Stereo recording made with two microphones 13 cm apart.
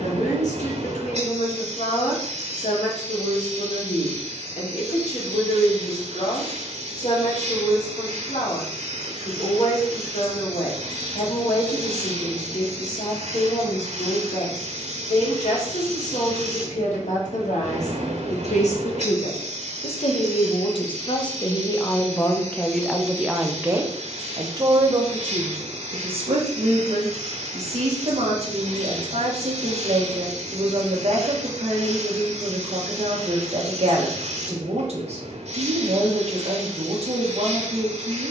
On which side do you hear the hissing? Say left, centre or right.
right.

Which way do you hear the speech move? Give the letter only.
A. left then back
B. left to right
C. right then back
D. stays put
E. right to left
B.